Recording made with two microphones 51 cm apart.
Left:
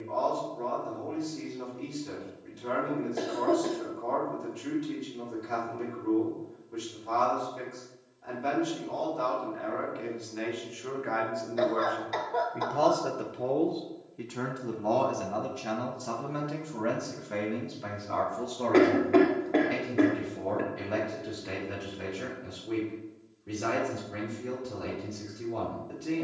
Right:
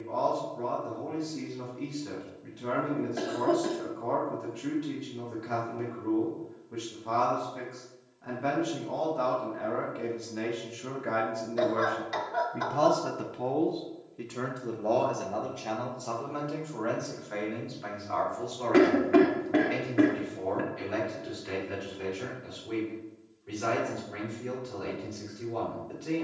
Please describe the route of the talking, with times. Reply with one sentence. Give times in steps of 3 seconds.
You can hear the talking on the right from 0 s, in the centre from 12 s and on the left from 15 s.